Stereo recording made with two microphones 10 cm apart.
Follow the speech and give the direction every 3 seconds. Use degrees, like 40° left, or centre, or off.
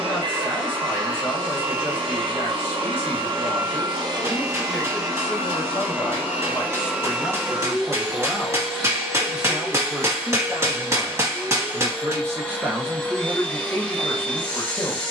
20° left, 20° left, 10° left, 20° right, 10° left.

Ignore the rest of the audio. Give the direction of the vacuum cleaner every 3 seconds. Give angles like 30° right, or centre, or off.
50° right, 40° right, 10° right, 10° left, 20° left.